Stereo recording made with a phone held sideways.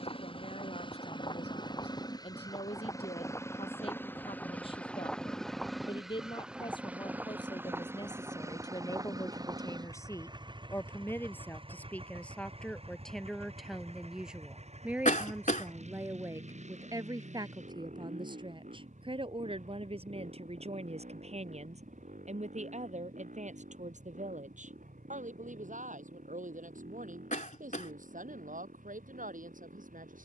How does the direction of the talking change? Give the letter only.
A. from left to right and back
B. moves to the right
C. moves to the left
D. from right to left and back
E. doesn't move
B.